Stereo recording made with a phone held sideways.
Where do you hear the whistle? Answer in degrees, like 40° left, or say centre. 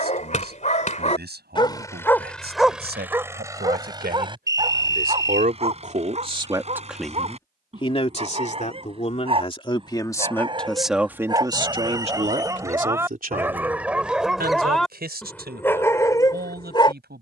20° right.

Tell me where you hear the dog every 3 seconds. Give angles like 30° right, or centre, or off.
30° left, 30° right, 40° right, 30° right, 10° right, 20° left.